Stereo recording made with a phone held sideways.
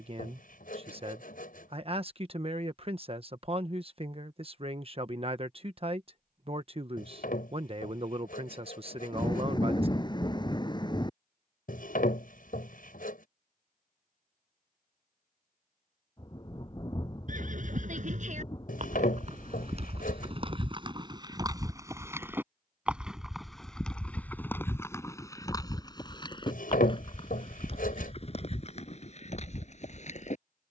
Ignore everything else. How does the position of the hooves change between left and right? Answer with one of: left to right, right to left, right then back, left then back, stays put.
right to left.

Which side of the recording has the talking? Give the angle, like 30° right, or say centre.
40° right.